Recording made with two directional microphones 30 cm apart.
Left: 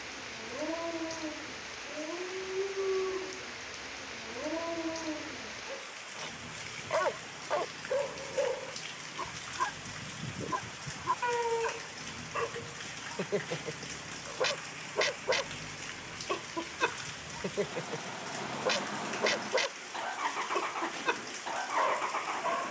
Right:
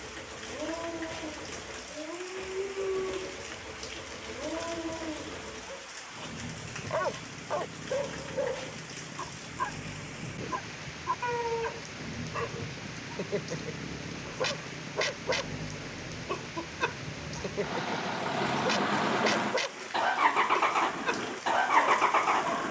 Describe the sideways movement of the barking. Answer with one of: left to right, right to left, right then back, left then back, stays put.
stays put.